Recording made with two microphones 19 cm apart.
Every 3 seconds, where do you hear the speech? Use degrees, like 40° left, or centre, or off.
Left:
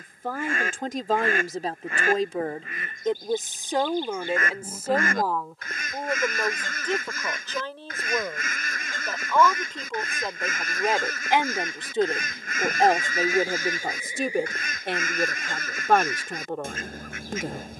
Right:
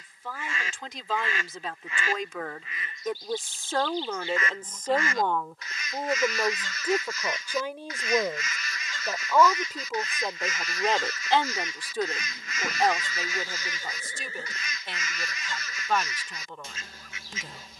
50° left, 10° left, 10° right, centre, 50° left, 60° left.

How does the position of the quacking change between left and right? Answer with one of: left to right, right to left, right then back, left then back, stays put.
stays put.